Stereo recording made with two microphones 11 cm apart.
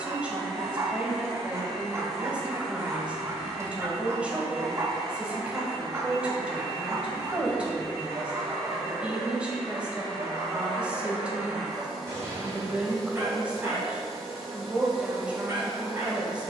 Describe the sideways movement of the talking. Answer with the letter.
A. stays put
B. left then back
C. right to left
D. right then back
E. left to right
A.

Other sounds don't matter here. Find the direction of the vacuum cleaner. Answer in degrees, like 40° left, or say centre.
centre.